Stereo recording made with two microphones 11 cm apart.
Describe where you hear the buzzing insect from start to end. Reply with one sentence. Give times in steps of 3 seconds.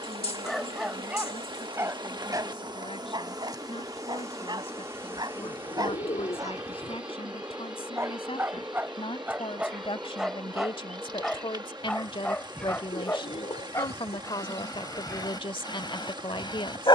You can hear the buzzing insect on the right from 0 s and in the centre from 6 s.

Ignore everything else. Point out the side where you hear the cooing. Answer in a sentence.
You can hear the cooing on the left.